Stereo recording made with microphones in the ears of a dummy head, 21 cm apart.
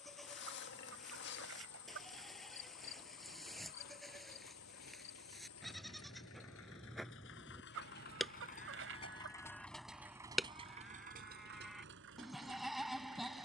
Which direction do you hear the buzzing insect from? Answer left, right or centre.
left.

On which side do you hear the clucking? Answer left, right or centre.
right.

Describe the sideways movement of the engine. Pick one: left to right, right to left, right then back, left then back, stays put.
left to right.